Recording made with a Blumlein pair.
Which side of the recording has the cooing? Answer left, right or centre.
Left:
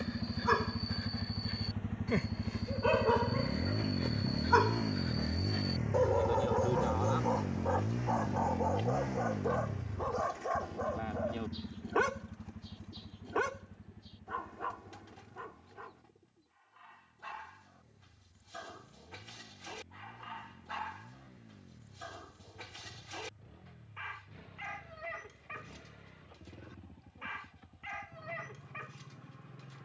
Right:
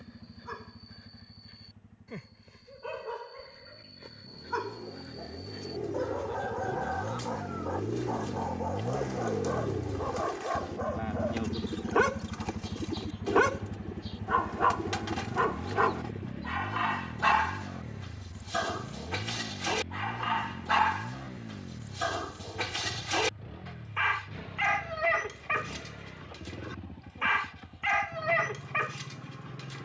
right.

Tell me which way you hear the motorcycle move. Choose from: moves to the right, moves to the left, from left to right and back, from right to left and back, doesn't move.
moves to the right.